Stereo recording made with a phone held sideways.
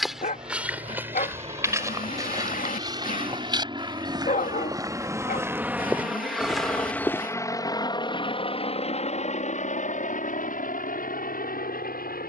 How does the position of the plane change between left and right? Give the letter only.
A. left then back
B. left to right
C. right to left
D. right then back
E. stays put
C.